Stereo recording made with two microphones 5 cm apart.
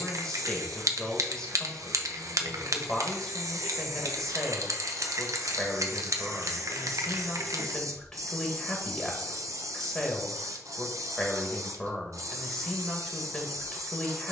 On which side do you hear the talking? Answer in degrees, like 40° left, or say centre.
10° left.